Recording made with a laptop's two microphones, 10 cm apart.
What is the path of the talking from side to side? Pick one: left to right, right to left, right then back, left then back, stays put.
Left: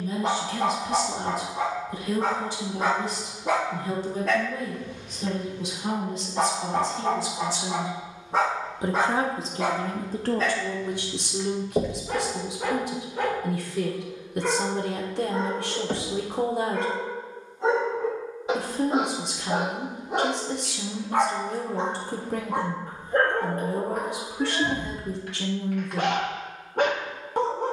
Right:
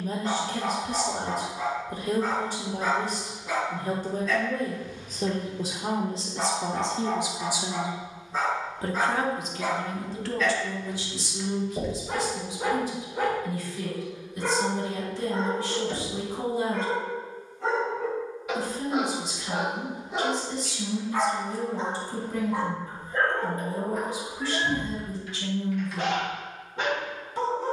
right to left.